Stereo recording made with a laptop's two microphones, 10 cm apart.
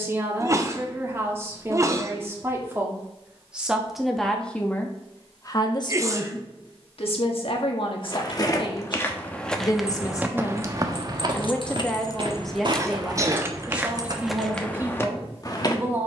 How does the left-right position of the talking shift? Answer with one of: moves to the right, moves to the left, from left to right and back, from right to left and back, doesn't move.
from right to left and back.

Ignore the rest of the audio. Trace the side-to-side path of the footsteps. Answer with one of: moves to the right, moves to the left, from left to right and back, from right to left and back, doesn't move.
from left to right and back.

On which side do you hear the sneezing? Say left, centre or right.
right.